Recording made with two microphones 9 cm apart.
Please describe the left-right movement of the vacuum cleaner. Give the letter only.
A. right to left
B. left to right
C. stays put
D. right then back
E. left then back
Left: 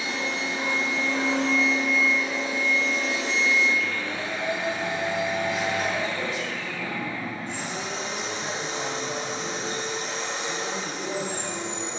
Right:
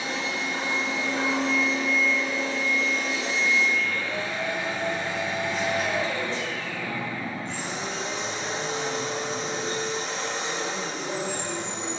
E.